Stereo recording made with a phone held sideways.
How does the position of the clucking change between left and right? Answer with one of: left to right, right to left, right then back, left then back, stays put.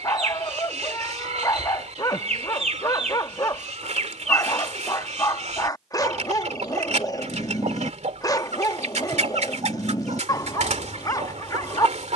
stays put.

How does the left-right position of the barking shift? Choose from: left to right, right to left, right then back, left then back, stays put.
stays put.